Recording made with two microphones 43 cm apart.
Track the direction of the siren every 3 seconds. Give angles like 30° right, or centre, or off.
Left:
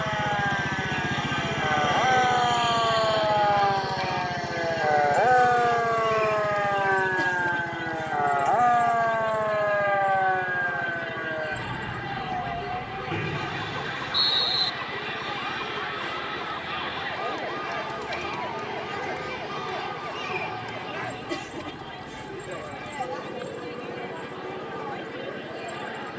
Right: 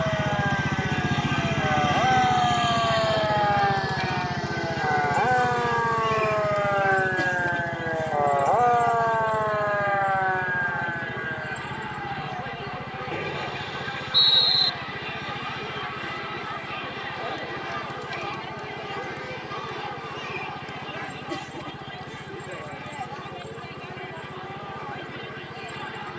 50° right, 20° right, 20° left, 50° left, 70° left, 70° left, 80° left, 80° left, 80° left.